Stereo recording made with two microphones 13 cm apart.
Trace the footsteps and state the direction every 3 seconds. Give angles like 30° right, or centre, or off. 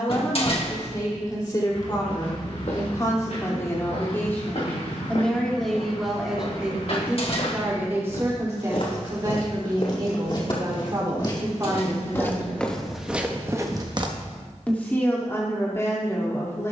60° left, 60° left, 50° left, 40° left, 10° right, off.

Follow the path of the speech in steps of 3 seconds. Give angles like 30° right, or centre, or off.
30° left, 20° left, 10° right, 30° right, 10° right, 20° left.